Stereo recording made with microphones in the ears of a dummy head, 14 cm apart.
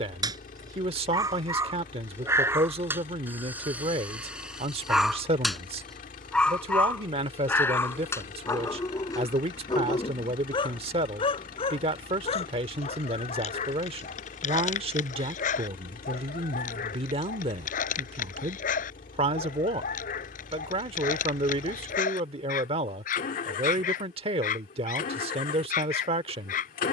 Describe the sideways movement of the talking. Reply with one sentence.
In this clip you hear the talking stay put.